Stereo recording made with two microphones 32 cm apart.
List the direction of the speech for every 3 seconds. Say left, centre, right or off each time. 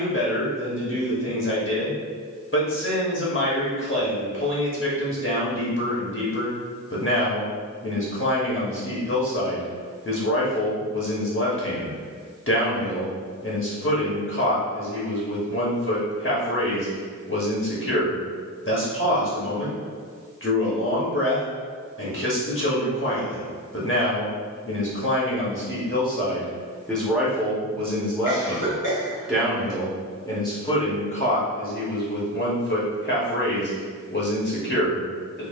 left, left, left, left, left, left, left, left, left, centre, left, left.